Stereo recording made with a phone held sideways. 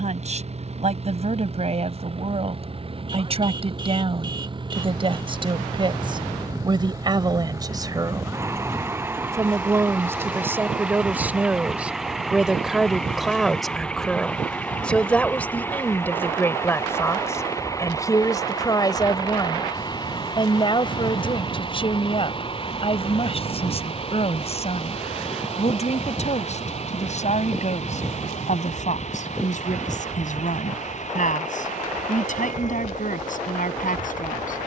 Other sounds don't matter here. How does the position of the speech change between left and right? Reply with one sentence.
In this clip you hear the speech move from right to left.